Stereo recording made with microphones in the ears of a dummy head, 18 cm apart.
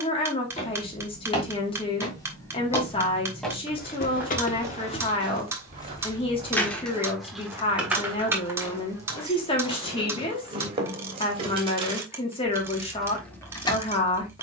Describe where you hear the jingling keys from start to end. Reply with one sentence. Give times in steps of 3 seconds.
In this clip you hear the jingling keys not at all from 0 s, on the left from 3 s, in the centre from 6 s, on the right from 9 s and in the centre from 12 s.